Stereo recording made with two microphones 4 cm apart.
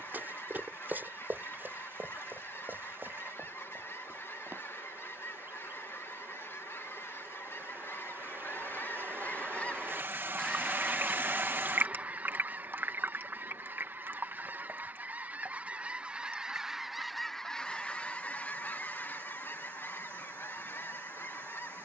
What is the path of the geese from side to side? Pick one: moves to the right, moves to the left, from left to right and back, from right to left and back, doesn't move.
from left to right and back.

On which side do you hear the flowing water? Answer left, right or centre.
right.